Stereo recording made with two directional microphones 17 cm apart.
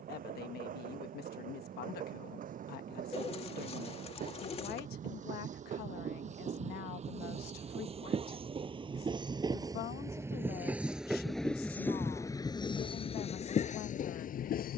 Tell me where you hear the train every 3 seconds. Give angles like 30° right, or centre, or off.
60° right, 50° right, 40° right, 10° right, 40° left.